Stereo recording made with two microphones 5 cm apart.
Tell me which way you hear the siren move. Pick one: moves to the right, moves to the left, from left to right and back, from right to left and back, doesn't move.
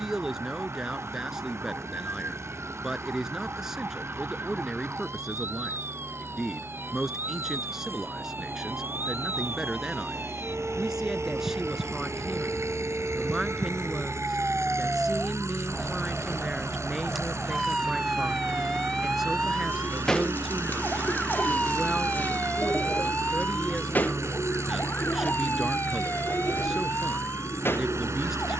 moves to the left.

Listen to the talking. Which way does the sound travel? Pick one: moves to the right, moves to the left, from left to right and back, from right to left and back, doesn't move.
doesn't move.